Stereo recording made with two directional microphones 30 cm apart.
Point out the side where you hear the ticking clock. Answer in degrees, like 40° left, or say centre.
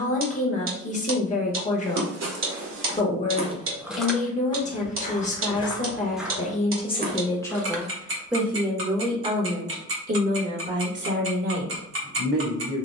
40° right.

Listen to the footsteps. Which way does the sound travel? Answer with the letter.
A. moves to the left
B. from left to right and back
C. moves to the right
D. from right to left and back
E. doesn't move
D.